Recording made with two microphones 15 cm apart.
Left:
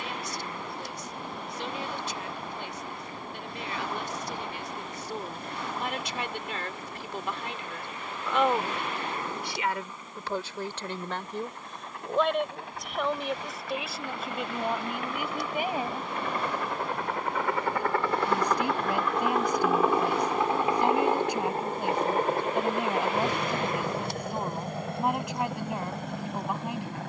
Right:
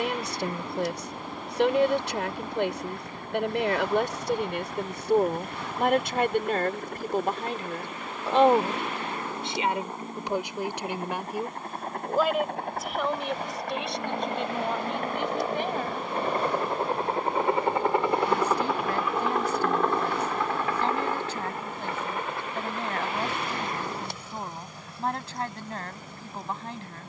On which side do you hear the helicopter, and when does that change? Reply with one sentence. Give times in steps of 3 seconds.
In this clip you hear the helicopter on the right from 0 s, in the centre from 18 s and on the left from 21 s.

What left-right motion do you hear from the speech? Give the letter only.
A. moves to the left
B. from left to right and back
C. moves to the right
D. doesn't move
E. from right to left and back
A.